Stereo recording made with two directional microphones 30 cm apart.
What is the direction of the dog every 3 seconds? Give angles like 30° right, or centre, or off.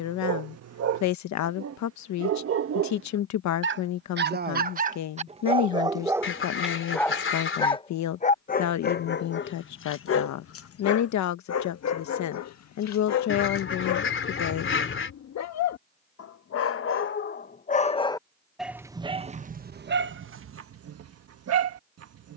50° right, 30° right, 10° left, 50° left, 60° left, 50° left, 30° right, 50° right.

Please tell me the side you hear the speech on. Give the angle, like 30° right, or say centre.
70° left.